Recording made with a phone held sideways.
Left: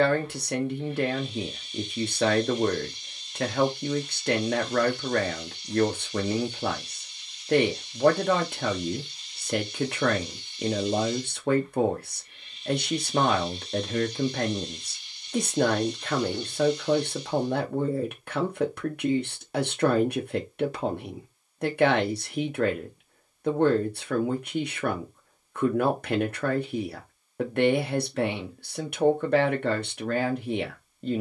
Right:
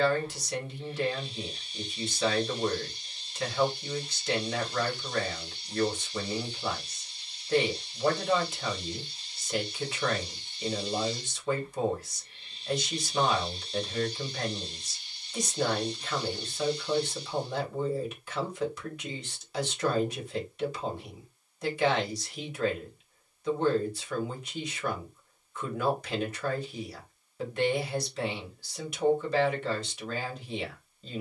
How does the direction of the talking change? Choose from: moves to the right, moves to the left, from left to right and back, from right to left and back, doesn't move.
doesn't move.